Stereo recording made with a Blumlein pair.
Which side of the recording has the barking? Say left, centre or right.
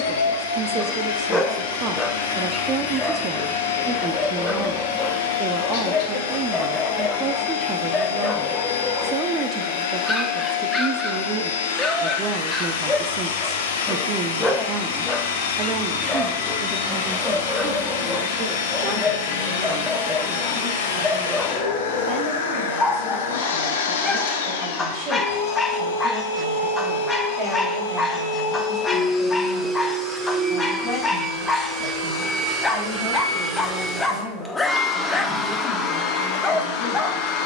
centre.